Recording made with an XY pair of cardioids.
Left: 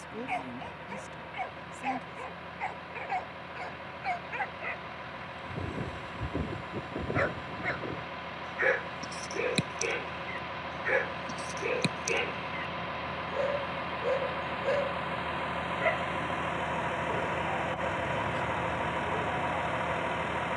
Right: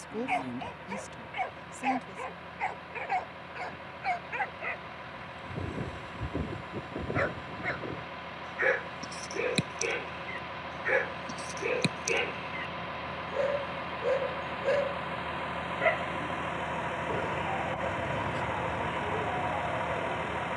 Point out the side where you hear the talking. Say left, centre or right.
right.